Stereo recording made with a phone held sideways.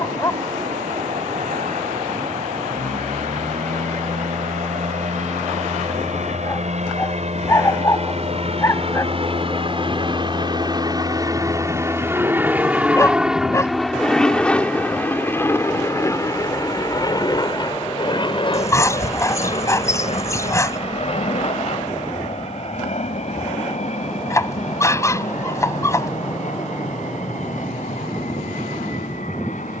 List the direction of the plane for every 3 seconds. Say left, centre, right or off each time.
right, right, right, right, centre, left, left, left, left, left.